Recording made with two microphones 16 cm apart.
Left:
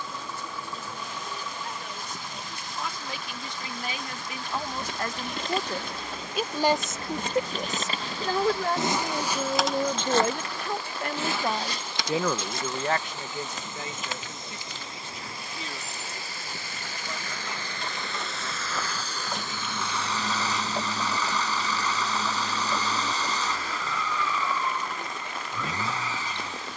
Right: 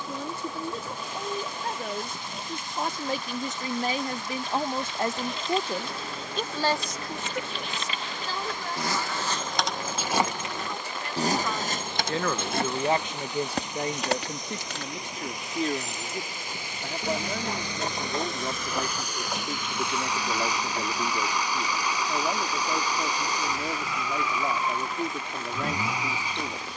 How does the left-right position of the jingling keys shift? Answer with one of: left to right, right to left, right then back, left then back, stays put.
right then back.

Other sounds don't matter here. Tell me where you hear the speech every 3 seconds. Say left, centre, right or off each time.
right, right, left, left, right, right, right, right, right.